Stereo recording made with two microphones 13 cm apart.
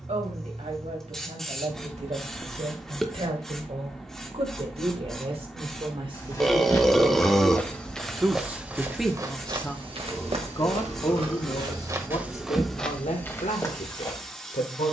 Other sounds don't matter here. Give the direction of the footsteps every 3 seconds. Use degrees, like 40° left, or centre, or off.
off, off, 10° left, 40° right, 10° left.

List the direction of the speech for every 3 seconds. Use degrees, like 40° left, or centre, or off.
60° right, 50° right, 20° right, 30° left, 60° left.